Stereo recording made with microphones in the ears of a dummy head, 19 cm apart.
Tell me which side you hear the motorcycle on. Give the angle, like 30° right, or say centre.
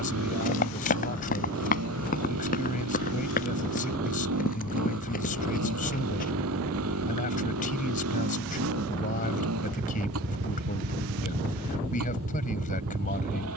80° right.